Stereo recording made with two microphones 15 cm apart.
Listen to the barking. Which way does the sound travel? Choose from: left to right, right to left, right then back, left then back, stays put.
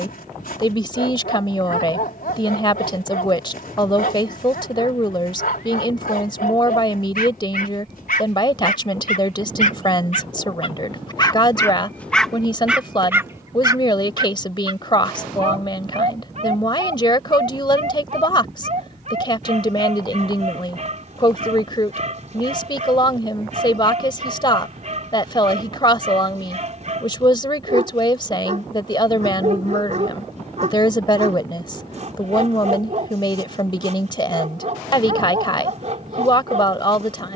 left to right.